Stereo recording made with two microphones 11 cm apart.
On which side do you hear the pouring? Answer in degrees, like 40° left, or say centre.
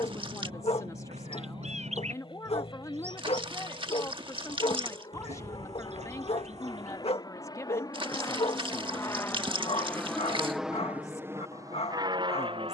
50° right.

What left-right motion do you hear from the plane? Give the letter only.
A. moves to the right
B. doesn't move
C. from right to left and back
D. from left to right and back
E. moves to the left
A.